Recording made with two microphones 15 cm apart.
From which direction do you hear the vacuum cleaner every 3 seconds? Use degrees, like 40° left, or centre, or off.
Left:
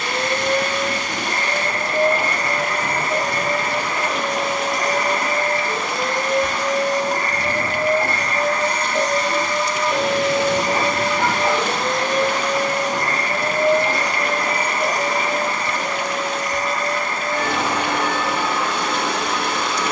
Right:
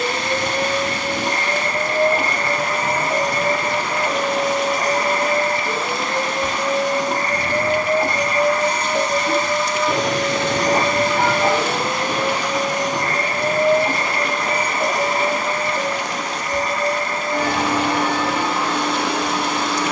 30° right, 30° right, 20° right, centre, 20° right, 30° right, 30° right.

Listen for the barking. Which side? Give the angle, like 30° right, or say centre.
70° right.